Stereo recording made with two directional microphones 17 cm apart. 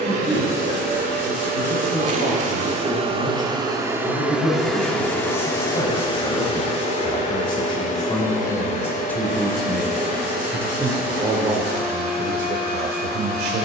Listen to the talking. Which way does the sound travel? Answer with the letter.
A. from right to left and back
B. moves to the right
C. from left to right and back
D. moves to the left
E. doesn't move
B.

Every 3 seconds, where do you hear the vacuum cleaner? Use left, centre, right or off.
right, centre, left, left, left.